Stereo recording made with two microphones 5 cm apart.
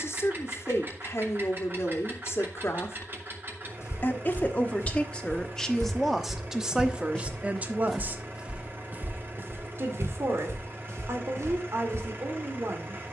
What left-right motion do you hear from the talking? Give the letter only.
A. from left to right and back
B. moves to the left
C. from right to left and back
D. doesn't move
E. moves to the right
E.